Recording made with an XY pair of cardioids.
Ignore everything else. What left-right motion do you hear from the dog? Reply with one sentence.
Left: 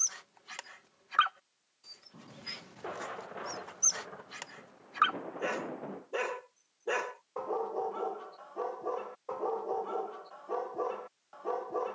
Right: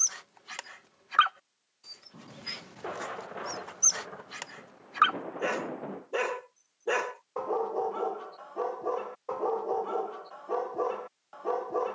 In this clip you hear the dog stay put.